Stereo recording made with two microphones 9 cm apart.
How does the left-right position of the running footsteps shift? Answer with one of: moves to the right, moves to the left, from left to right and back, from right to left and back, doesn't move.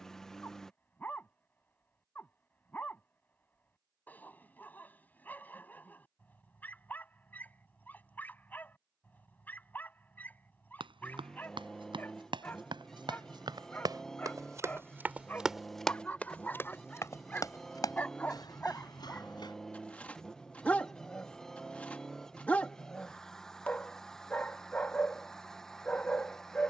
moves to the left.